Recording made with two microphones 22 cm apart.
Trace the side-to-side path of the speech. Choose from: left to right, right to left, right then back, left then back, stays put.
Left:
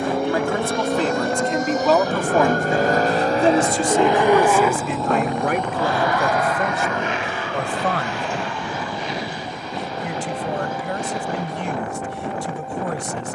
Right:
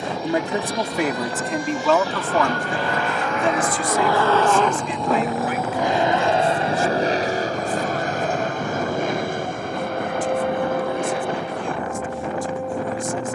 right to left.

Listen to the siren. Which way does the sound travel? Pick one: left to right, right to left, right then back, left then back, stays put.
left to right.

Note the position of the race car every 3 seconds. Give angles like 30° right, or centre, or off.
60° left, 10° left, 40° right, 50° right, off.